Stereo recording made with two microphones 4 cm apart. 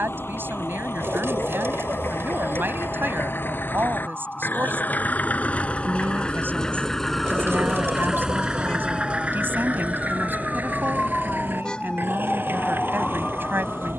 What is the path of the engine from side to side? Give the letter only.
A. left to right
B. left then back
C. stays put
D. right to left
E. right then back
A.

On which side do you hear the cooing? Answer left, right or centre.
right.